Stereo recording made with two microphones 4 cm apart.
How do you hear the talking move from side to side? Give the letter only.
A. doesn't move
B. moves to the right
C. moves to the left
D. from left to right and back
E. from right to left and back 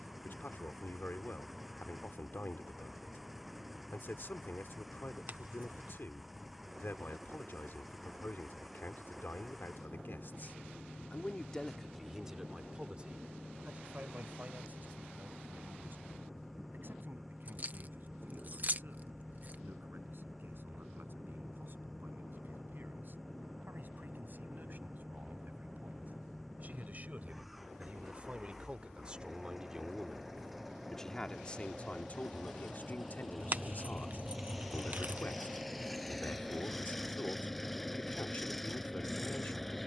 D.